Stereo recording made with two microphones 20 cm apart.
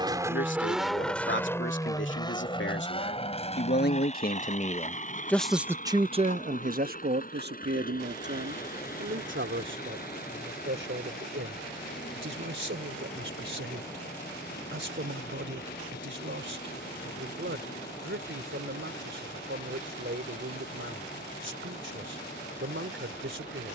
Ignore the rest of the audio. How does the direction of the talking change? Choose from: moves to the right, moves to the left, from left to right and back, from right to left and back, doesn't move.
moves to the right.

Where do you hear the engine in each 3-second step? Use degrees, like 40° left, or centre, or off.
10° left, 40° left, 40° left, 50° left, 50° left, 50° left, 50° left, 50° left.